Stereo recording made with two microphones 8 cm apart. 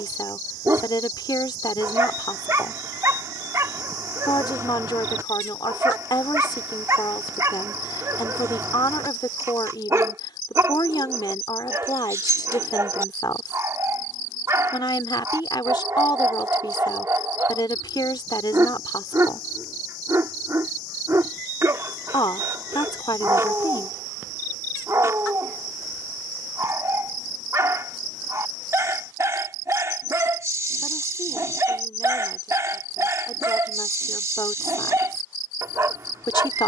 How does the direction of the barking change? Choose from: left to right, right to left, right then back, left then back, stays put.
stays put.